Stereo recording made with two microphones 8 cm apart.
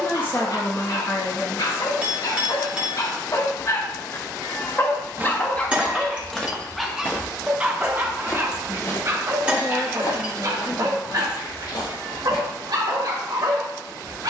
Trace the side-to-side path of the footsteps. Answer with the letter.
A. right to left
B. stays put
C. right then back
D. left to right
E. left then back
A.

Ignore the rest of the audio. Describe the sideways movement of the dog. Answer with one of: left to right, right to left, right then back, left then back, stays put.
left to right.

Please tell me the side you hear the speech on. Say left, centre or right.
left.